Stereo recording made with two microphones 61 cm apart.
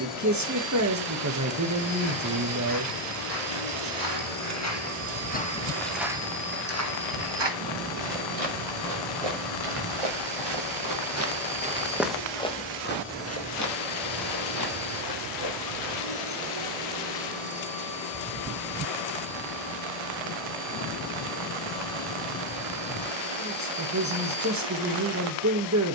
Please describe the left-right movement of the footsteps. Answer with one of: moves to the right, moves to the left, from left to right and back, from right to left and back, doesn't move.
from left to right and back.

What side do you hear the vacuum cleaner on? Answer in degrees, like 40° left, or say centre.
80° left.